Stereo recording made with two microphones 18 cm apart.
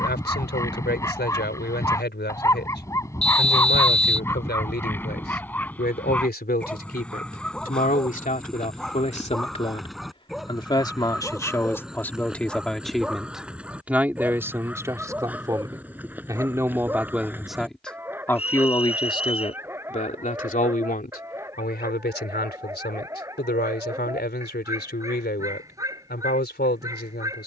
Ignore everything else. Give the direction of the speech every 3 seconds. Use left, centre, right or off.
left, left, left, left, centre, centre, left, left, left.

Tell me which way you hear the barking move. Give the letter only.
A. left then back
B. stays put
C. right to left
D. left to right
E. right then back
D.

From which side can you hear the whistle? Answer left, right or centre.
left.